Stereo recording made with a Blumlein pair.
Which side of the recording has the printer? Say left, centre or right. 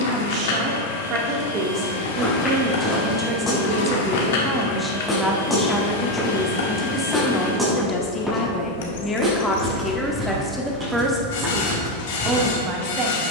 left.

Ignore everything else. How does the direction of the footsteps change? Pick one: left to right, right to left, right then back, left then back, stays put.
left to right.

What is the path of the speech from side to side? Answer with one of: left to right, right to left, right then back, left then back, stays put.
left then back.